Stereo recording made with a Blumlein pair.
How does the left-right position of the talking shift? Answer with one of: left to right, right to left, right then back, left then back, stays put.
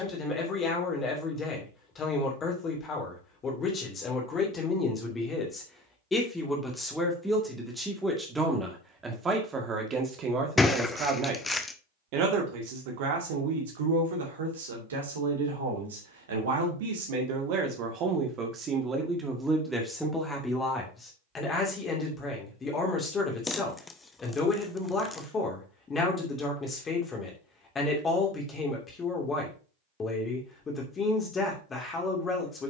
right then back.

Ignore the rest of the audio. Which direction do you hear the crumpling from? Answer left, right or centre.
centre.